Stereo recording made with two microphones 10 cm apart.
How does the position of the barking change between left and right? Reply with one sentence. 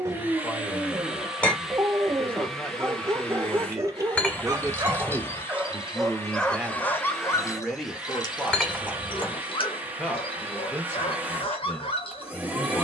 You can hear the barking go from the right side to the left.